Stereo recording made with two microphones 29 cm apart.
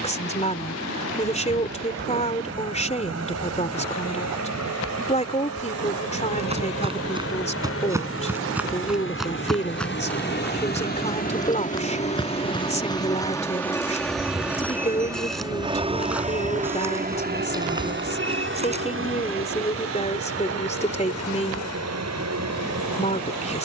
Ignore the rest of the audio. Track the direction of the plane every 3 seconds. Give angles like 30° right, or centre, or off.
70° left, 60° left, 50° left, 40° left, 10° left, 20° right, 40° right, 60° right.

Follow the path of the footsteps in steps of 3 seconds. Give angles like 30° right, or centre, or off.
off, off, 10° right, 10° left, 10° left, 10° right, 20° right, off.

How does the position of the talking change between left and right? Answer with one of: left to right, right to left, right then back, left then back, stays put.
stays put.